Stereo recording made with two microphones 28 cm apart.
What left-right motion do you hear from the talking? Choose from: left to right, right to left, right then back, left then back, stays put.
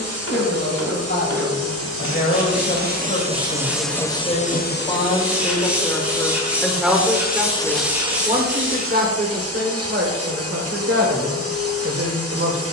left to right.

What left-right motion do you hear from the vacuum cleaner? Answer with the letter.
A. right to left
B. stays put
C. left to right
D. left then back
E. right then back
D.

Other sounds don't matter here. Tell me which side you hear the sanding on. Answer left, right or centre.
centre.